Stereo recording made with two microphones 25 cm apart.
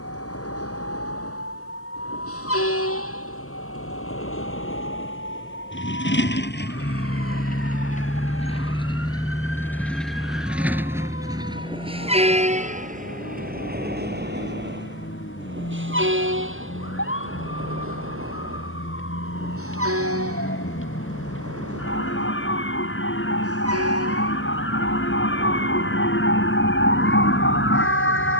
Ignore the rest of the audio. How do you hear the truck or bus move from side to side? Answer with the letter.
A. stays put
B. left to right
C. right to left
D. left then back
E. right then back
B.